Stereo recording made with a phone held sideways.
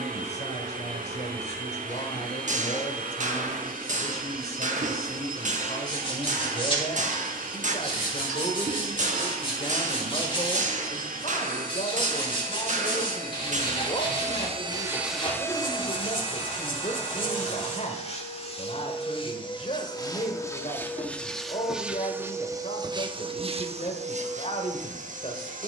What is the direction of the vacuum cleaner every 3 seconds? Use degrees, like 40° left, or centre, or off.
70° right, 70° right, 70° right, 70° right, 60° right, 40° left, 30° left, 20° right, 60° right.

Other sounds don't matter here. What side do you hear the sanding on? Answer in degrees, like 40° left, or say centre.
40° left.